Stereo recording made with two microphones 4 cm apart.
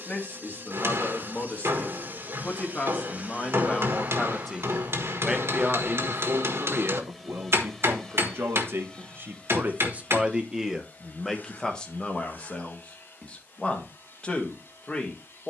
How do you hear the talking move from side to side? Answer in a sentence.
In this clip you hear the talking move from left to right and back again.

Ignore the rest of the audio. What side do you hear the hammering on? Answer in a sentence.
You can hear the hammering on the right.